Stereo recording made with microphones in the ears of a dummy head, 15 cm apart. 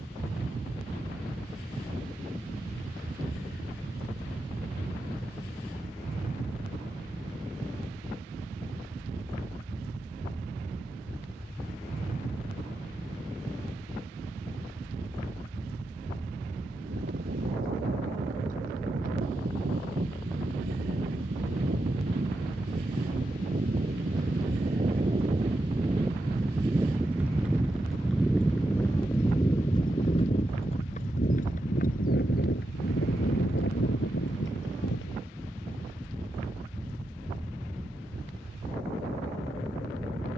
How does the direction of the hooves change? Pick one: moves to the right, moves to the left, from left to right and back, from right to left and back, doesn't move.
moves to the left.